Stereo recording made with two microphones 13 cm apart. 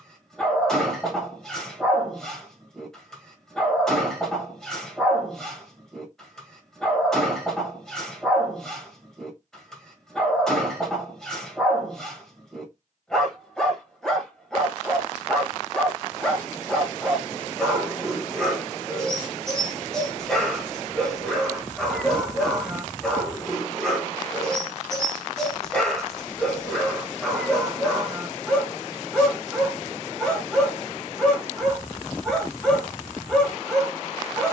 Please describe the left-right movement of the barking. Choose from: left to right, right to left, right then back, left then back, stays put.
stays put.